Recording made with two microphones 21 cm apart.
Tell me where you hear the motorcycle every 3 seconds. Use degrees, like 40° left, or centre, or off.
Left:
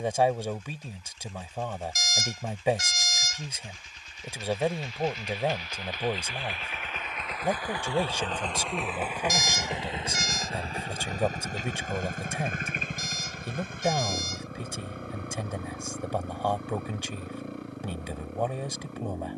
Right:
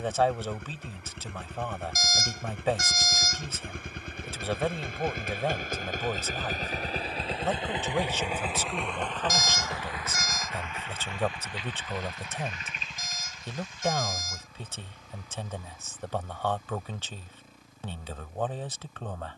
80° right, 60° right, 30° right, 30° left, 60° left, 70° left, 70° left.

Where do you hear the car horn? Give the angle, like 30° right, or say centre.
50° right.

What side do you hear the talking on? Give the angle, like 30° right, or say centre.
10° left.